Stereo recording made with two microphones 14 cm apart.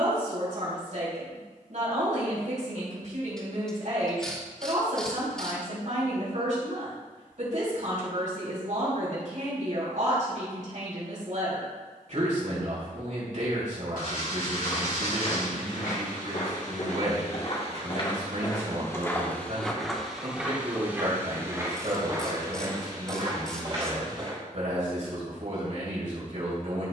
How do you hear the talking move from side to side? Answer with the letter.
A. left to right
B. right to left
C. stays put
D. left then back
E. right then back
C.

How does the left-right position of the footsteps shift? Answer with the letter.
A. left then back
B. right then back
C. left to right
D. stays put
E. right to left
C.